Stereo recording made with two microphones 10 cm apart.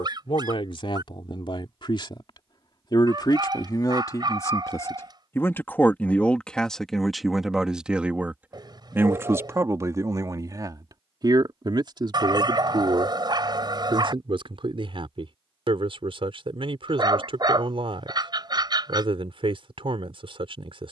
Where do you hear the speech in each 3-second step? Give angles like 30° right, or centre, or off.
50° left, 30° left, centre, 30° right, 50° right, 60° right, 60° right.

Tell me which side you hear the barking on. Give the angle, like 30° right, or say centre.
40° right.